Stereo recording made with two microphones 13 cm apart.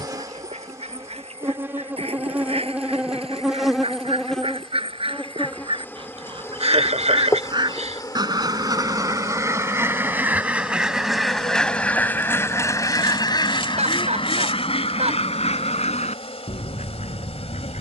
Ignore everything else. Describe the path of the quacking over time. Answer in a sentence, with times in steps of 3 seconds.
You can hear the quacking on the right from 0 s, in the centre from 9 s and on the left from 12 s.